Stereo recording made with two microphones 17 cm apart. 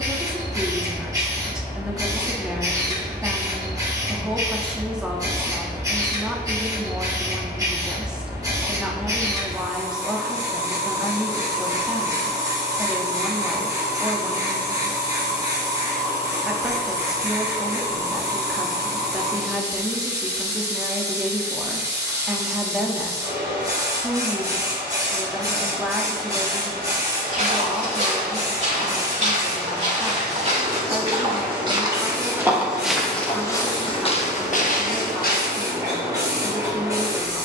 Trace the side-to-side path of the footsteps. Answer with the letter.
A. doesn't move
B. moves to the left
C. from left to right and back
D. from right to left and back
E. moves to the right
B.